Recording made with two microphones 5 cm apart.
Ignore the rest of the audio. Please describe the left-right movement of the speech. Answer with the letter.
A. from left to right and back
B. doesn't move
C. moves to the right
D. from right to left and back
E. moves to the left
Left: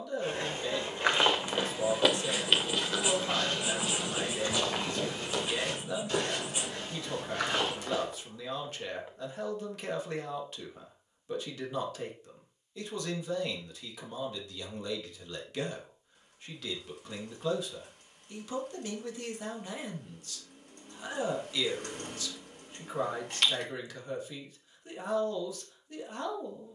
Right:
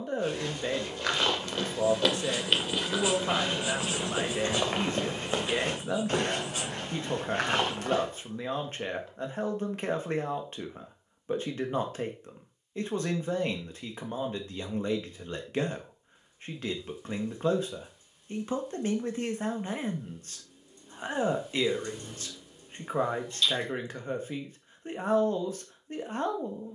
B.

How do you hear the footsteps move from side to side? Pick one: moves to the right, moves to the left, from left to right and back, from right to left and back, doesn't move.
moves to the right.